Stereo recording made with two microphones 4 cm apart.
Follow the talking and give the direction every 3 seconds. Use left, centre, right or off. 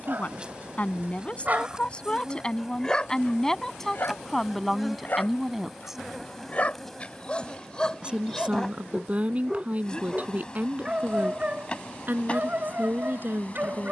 left, centre, right, right, right.